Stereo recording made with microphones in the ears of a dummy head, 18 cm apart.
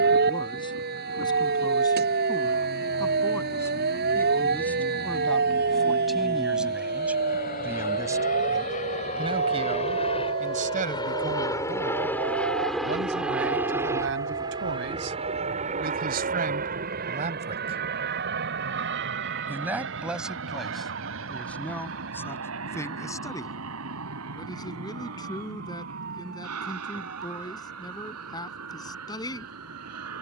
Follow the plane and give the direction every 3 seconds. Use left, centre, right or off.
left, left, left, left, centre, right, right, right, right, right.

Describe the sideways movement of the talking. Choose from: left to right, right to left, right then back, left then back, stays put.
right then back.